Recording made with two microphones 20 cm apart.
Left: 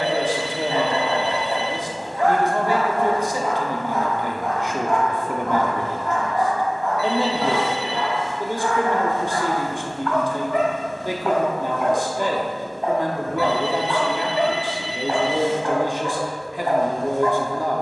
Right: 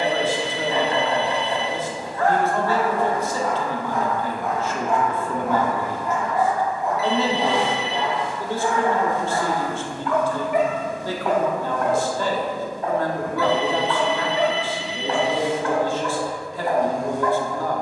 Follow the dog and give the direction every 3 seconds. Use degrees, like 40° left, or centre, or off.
20° left, centre, 20° right, 10° right, 20° left, 20° left.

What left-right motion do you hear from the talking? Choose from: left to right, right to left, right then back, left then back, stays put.
stays put.